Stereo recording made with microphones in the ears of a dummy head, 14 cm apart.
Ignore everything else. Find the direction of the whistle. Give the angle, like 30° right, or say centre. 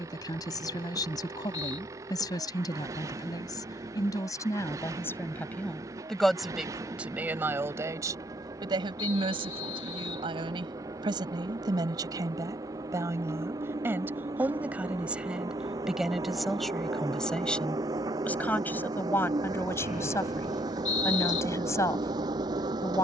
50° left.